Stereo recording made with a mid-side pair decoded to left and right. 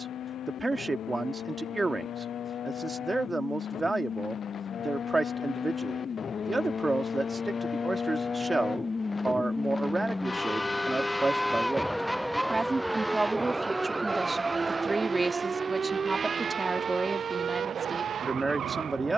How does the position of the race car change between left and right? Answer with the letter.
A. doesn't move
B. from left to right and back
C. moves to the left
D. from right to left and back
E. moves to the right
E.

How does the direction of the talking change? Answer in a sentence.
In this clip you hear the talking stay put.